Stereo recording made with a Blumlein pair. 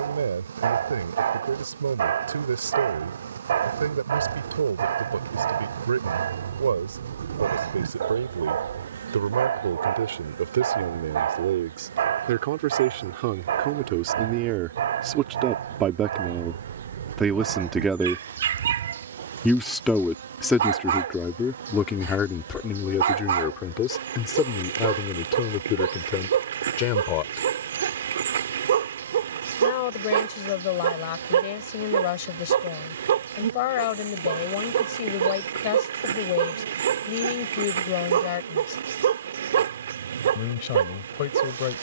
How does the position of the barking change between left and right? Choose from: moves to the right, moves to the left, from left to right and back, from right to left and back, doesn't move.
doesn't move.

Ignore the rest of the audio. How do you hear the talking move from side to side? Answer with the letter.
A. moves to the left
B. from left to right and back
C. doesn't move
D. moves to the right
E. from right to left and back
A.